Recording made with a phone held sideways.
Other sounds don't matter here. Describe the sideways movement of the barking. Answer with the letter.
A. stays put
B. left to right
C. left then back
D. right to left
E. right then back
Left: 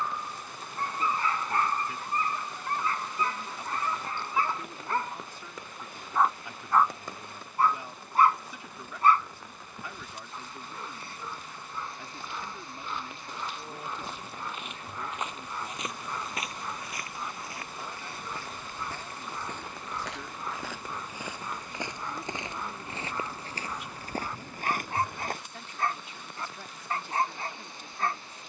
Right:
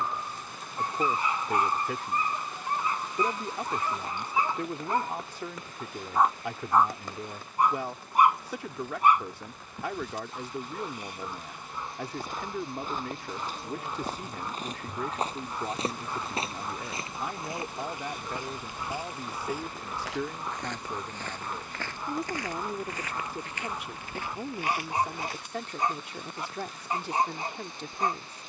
A.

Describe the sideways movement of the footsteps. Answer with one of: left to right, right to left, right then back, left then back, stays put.
right to left.